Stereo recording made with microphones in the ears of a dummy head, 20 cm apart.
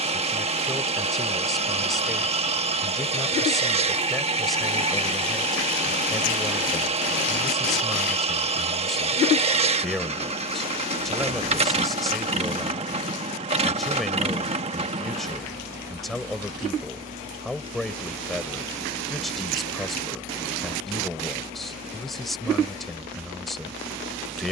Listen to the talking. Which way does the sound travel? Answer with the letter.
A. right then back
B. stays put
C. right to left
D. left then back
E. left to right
B.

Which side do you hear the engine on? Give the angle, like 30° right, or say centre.
30° right.